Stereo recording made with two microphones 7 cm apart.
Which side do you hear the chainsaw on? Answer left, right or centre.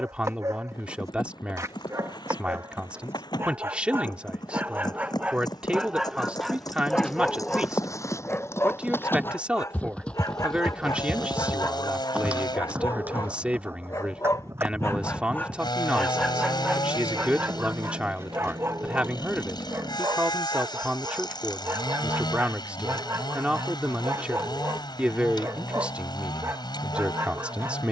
left.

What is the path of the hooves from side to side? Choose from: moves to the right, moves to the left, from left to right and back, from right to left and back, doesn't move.
moves to the right.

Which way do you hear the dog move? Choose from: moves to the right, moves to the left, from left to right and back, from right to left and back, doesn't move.
from right to left and back.